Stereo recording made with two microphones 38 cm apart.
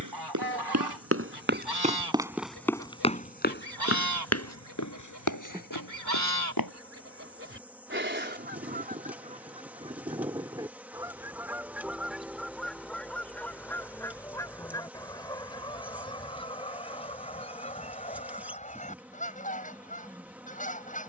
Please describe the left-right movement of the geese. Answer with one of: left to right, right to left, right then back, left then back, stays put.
right to left.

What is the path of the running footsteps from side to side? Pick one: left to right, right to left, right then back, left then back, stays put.
right to left.